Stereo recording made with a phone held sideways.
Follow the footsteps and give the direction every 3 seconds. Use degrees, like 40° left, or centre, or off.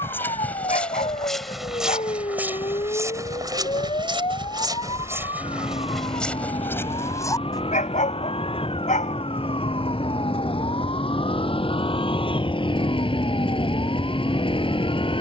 centre, 20° right, 10° left, off, off.